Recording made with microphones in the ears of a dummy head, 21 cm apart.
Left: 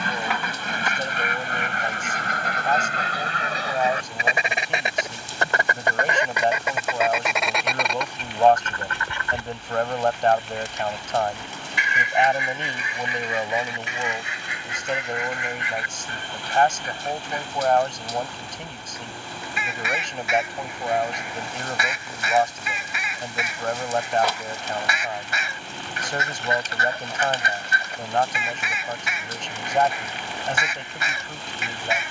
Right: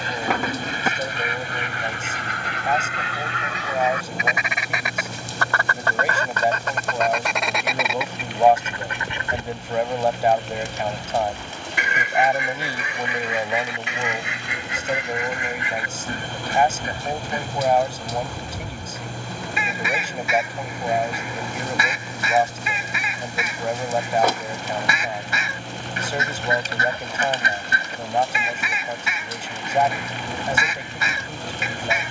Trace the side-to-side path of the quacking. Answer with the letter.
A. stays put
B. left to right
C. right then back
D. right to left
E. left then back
B.